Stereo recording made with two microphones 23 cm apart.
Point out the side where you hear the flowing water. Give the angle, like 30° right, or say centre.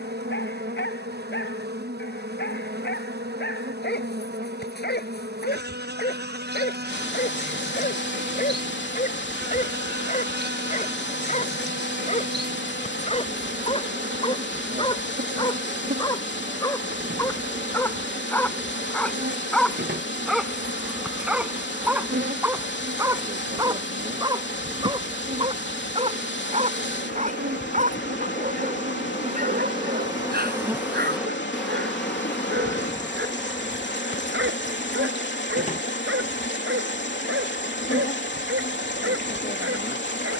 50° left.